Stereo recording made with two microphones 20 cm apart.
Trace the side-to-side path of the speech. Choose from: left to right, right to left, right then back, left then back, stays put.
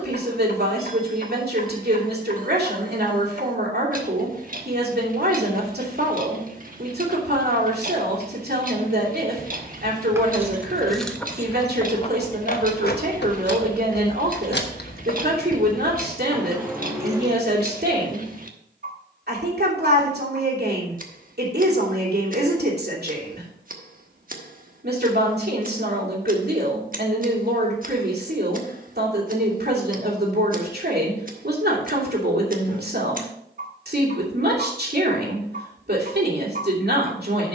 stays put.